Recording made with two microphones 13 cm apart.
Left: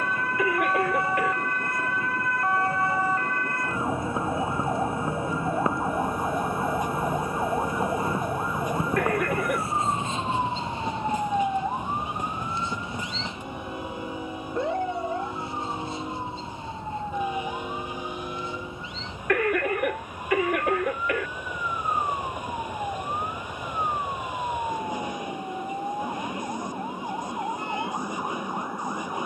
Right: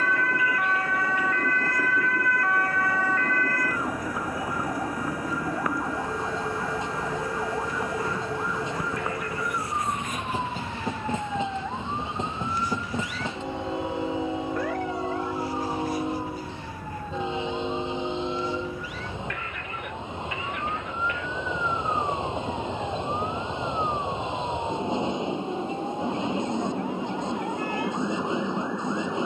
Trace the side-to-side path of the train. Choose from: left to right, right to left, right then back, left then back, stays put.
stays put.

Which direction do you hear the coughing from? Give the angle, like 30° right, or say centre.
80° left.